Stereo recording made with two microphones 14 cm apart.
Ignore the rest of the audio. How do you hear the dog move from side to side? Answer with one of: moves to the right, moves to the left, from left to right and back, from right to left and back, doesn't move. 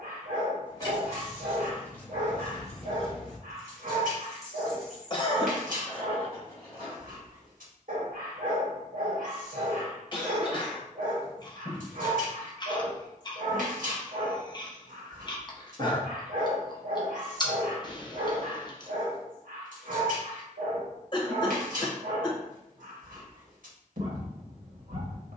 doesn't move.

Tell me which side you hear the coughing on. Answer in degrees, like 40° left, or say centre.
40° left.